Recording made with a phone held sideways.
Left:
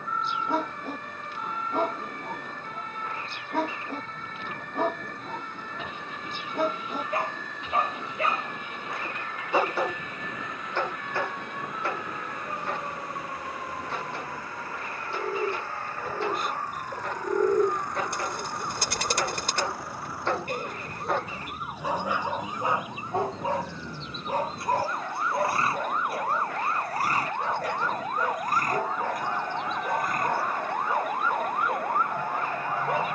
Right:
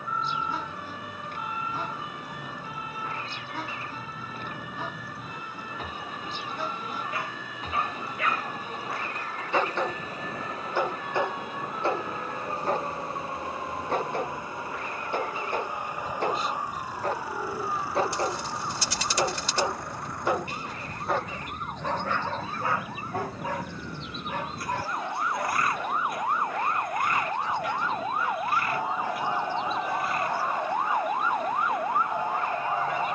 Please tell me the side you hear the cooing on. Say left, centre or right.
left.